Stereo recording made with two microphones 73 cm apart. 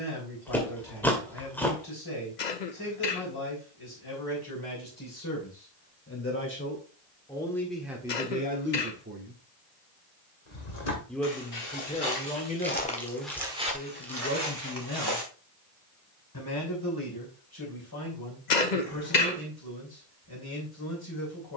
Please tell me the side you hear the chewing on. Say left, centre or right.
centre.